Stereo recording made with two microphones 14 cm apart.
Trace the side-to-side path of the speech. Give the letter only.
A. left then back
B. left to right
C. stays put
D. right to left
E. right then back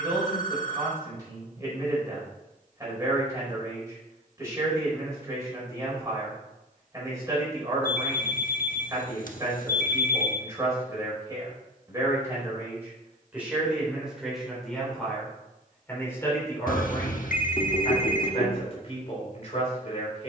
D.